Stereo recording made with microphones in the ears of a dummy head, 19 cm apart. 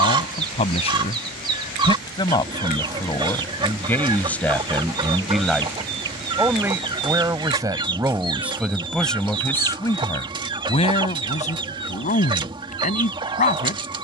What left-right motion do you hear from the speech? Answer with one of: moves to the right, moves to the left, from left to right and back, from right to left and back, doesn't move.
from left to right and back.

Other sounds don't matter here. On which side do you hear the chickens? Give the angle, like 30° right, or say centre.
20° right.